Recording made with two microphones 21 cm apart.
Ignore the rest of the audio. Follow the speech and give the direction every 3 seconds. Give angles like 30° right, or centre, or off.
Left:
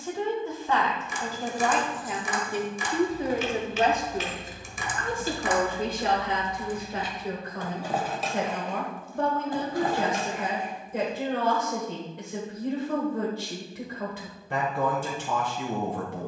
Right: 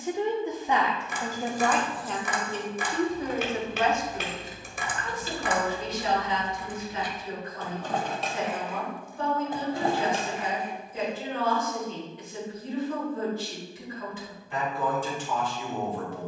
centre, 40° left, 60° left, 70° left, 70° left, 70° left.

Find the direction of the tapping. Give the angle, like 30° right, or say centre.
60° right.